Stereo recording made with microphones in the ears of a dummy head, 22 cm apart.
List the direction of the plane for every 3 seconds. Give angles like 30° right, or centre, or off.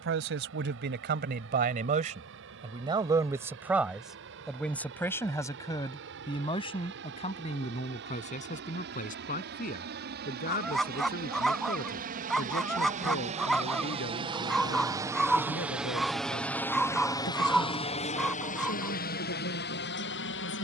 60° right, 60° right, 60° right, 50° right, 30° right, 10° left, 40° left.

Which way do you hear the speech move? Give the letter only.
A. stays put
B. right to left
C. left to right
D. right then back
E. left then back
B.